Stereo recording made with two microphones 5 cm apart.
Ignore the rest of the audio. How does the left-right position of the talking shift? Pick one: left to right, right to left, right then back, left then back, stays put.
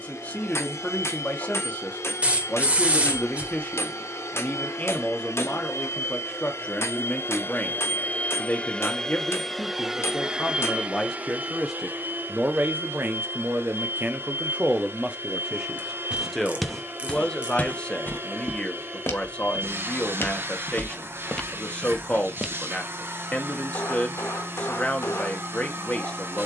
right then back.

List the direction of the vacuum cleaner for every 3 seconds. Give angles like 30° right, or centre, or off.
70° left, 70° left, 40° left, 20° right, 50° right, 50° right, 50° right, 50° right, 50° right.